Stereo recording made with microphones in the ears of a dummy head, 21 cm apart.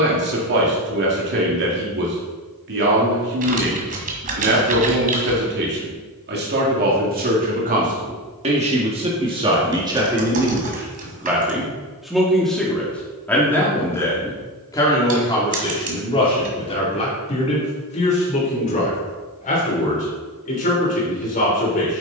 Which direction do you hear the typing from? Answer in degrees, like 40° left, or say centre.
40° right.